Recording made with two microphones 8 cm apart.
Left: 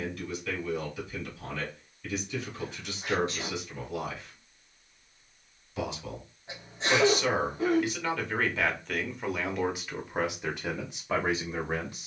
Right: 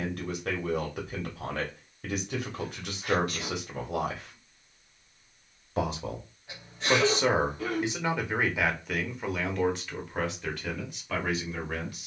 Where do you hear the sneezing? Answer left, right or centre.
left.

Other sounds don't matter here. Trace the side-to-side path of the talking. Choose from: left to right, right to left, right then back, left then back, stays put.
right to left.